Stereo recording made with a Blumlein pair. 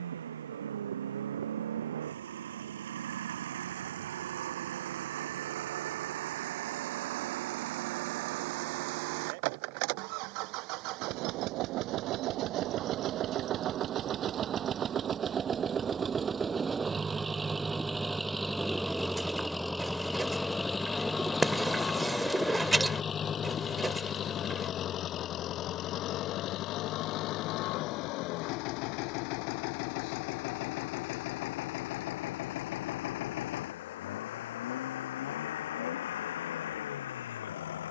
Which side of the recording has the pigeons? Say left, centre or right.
centre.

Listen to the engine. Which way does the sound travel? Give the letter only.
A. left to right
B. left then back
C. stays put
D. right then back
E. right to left
E.